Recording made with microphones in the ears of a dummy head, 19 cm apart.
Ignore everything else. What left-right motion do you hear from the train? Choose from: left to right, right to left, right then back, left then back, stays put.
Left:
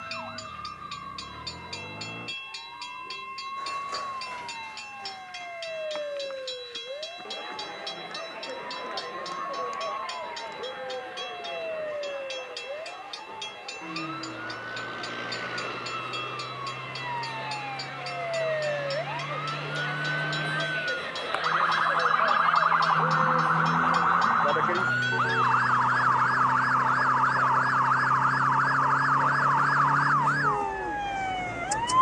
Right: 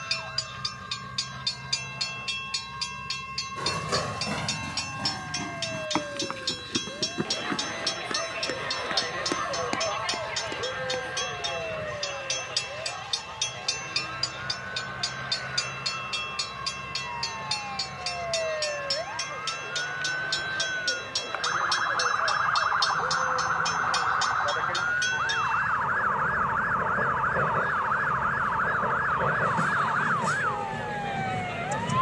stays put.